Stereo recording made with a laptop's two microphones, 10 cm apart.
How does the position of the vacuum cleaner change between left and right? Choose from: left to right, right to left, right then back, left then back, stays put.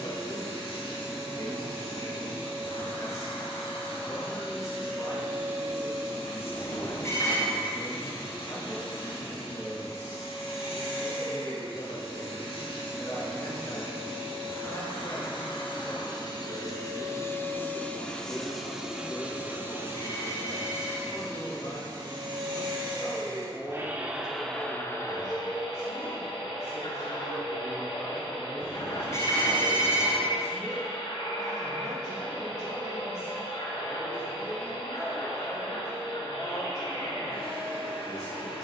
right then back.